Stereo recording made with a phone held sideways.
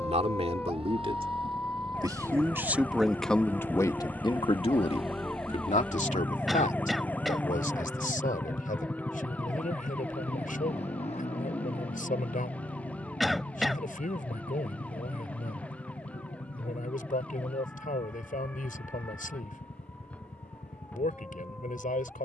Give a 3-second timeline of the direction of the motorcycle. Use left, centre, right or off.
right, centre, left, left, left, left, left, left.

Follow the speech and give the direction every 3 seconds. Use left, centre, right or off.
right, left, left, left, left, left, left, left.